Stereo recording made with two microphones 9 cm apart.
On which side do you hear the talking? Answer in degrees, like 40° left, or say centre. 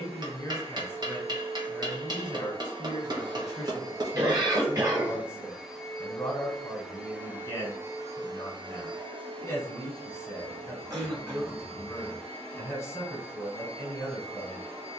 20° left.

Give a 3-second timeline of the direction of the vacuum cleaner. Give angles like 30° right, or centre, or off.
70° right, 20° right, 20° right, 70° right, 80° right.